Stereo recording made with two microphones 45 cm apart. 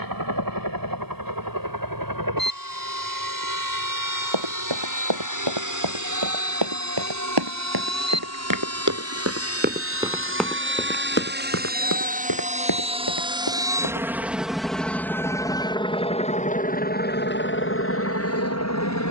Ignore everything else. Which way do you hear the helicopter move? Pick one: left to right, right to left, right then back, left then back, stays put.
right to left.